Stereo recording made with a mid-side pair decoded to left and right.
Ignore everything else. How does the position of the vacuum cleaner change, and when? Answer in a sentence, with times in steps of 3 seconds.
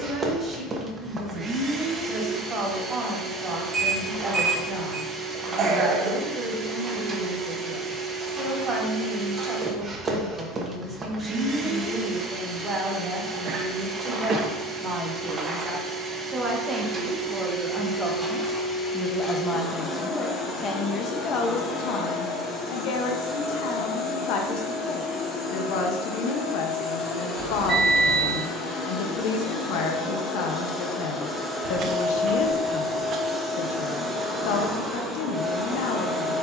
You can hear the vacuum cleaner on the right from 0 s, in the centre from 18 s, on the left from 21 s and in the centre from 30 s.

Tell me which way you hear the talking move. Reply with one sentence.
You can hear the talking move from right to left.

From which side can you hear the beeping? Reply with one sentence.
You can hear the beeping on the right.